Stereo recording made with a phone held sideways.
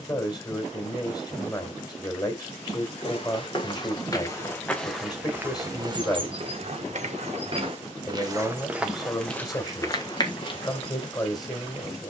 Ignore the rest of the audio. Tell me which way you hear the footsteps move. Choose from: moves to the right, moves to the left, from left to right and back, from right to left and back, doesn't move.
from left to right and back.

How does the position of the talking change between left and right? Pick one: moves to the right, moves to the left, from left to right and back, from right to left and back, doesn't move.
doesn't move.